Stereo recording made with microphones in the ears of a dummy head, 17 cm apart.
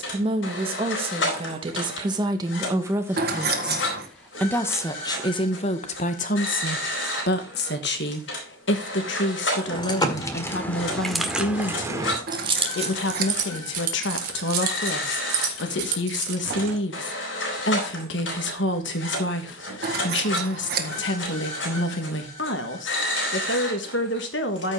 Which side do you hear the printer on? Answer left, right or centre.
left.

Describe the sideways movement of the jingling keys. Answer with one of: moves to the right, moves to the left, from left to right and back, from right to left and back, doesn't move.
moves to the right.